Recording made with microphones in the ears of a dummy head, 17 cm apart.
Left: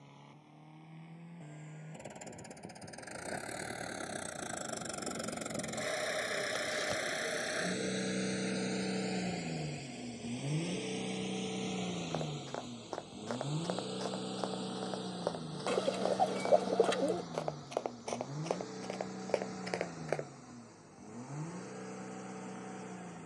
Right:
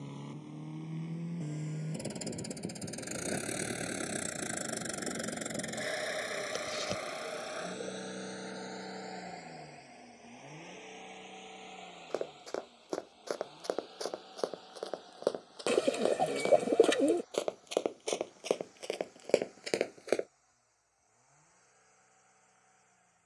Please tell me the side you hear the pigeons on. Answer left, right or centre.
right.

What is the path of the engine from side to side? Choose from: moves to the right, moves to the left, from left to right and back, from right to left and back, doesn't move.
moves to the left.